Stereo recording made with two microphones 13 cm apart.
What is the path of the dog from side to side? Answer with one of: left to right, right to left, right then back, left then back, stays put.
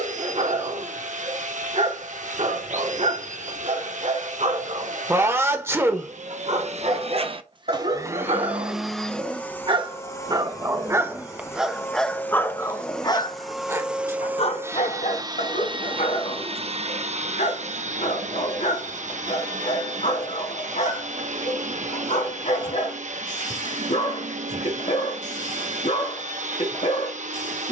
right to left.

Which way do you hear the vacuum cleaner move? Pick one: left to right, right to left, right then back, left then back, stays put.
left then back.